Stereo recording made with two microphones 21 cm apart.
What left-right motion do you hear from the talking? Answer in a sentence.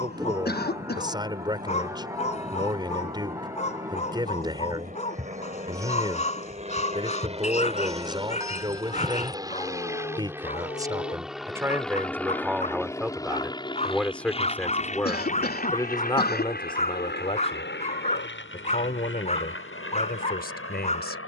You can hear the talking move from right to left.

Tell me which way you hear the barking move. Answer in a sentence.
In this clip you hear the barking stay in one place.